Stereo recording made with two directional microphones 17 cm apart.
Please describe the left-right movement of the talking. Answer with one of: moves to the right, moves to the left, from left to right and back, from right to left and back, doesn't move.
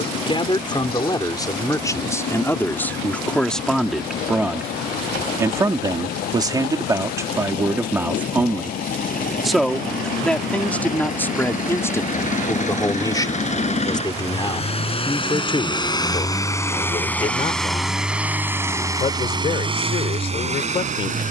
from left to right and back.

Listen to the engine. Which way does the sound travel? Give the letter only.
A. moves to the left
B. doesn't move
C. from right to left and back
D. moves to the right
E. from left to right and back
D.